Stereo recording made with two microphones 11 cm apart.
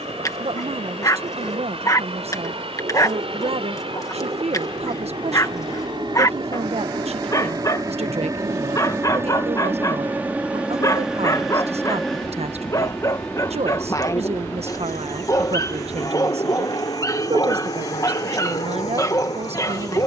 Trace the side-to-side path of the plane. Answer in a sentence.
You can hear the plane move to the left.